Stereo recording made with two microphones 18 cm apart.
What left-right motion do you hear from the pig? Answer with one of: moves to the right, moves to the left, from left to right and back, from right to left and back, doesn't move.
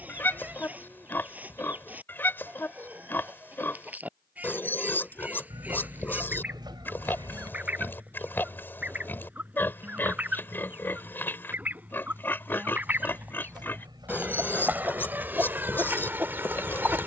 doesn't move.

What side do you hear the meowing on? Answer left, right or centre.
right.